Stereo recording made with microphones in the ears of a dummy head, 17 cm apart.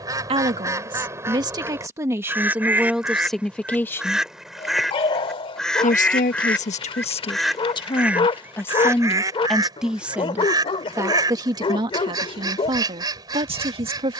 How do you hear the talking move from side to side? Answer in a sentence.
You can hear the talking move from right to left and back again.